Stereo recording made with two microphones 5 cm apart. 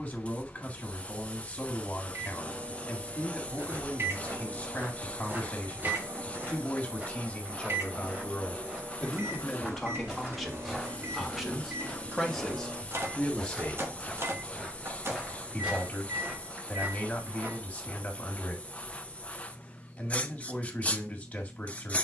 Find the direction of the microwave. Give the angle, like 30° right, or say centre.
50° right.